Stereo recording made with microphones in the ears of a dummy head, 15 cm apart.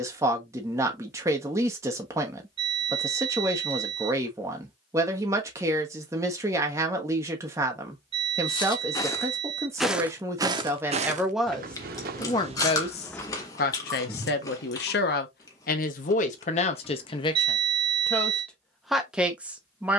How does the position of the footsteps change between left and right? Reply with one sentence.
In this clip you hear the footsteps move from left to right and back again.